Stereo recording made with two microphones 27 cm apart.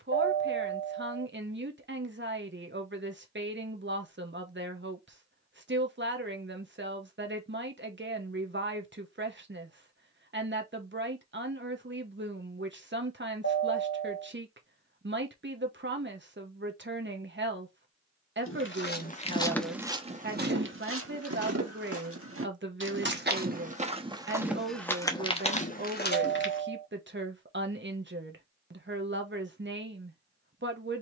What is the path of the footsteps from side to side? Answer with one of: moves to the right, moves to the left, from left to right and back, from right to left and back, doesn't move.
from left to right and back.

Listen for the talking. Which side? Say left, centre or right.
right.